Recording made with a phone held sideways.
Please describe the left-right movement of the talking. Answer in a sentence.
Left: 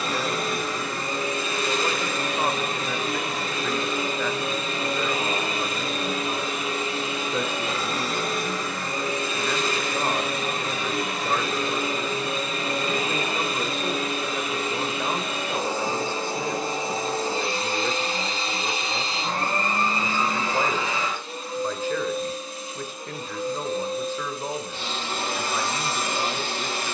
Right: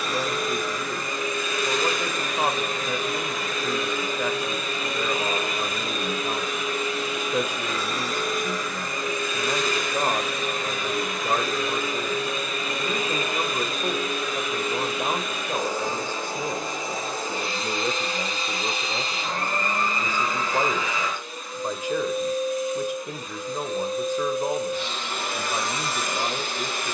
You can hear the talking stay put.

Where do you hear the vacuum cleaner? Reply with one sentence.
In this clip you hear the vacuum cleaner on the left.